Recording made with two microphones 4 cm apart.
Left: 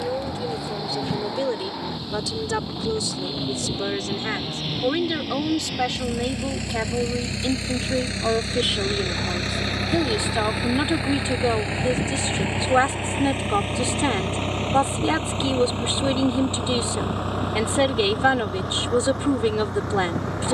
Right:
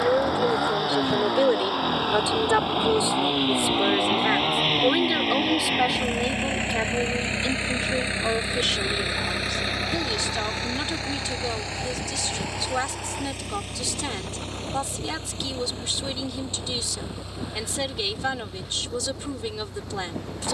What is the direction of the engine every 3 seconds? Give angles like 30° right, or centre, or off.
70° right, 60° right, 30° right, 10° left, 40° left, 50° left, 60° left.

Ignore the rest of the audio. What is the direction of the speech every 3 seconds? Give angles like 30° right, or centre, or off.
30° right, 10° right, 10° left, 30° left, 30° left, 30° left, 30° left.